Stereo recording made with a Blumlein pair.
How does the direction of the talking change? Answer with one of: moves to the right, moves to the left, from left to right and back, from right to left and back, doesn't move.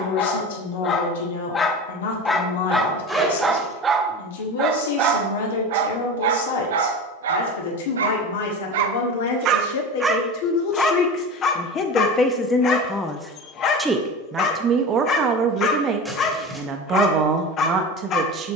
moves to the right.